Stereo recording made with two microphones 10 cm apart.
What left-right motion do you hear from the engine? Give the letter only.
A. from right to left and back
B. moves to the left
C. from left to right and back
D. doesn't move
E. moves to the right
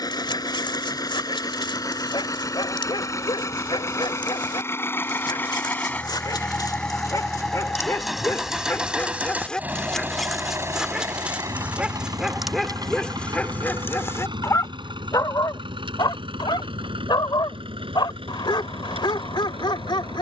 E.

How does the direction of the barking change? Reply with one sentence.
In this clip you hear the barking go right and come back.